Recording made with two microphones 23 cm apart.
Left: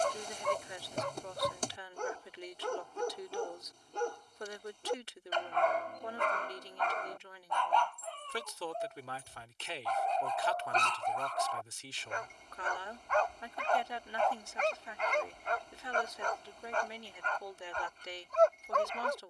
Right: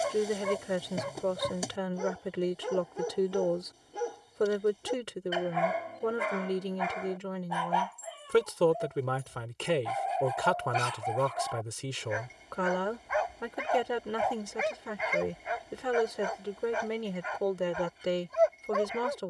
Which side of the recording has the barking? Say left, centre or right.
centre.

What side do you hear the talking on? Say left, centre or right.
right.